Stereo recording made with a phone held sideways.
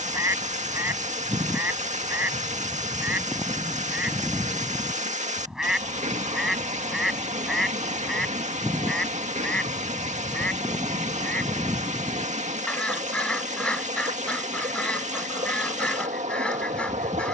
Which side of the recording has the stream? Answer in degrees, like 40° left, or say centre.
70° right.